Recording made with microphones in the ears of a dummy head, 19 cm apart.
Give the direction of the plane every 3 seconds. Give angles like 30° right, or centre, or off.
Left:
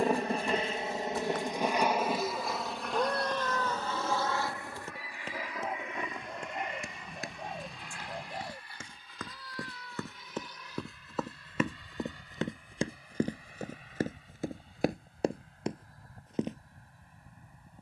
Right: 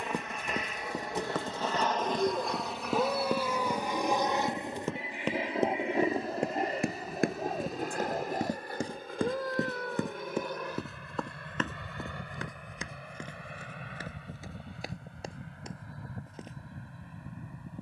10° left, 20° right, 30° right, 40° right, 50° right, 50° right.